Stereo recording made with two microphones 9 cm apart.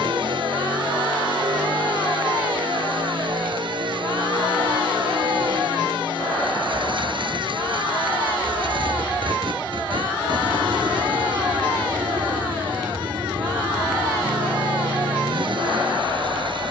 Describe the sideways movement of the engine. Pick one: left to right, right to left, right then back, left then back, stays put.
stays put.